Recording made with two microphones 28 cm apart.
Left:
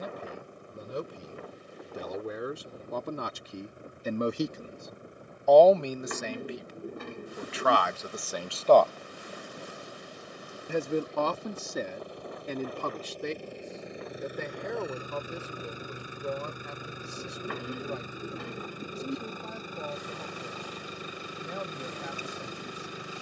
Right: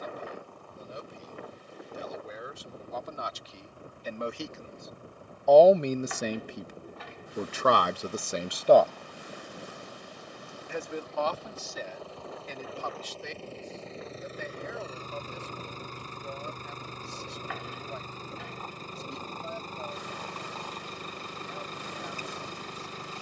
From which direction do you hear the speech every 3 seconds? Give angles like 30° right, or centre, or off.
70° left, 30° left, 40° right, 50° left, 70° left, 70° left, 70° left, 70° left.